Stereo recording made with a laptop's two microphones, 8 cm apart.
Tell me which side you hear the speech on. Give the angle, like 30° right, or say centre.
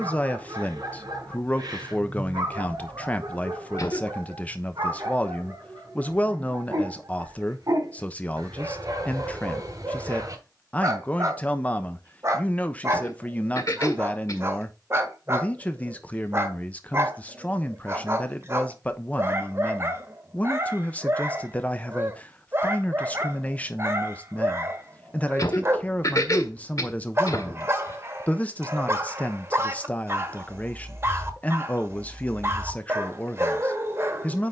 20° left.